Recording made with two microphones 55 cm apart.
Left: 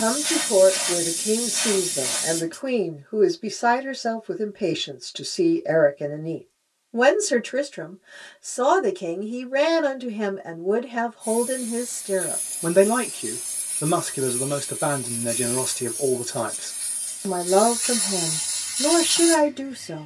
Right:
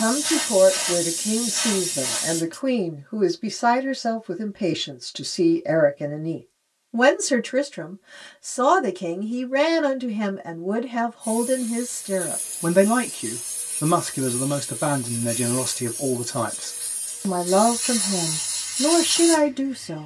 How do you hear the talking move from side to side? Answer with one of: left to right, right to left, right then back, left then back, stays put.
stays put.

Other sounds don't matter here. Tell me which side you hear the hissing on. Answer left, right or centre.
left.